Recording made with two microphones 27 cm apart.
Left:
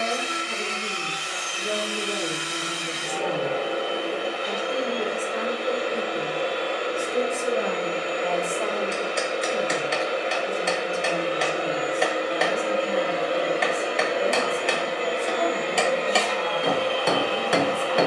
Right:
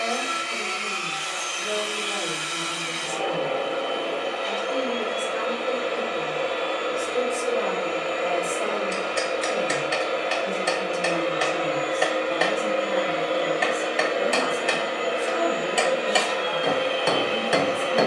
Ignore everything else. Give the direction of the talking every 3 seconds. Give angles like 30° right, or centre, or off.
30° left, 30° left, centre, 40° right, 60° right, 70° right.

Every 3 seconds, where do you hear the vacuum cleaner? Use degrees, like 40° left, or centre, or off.
20° left, 20° left, 20° left, 20° left, 10° left, 20° right.